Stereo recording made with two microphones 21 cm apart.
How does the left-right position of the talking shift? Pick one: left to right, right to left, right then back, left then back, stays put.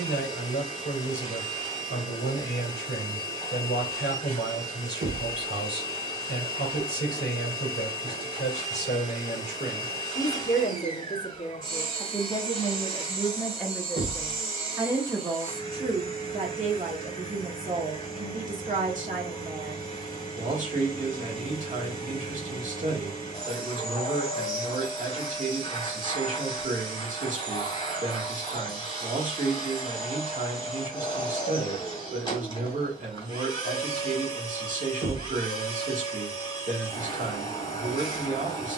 left to right.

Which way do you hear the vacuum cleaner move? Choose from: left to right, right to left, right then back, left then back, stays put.
stays put.